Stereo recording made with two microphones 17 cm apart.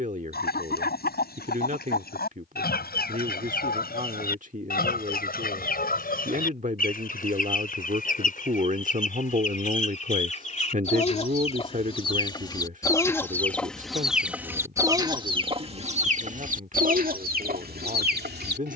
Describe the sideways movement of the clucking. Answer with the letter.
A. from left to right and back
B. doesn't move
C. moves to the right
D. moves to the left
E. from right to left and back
C.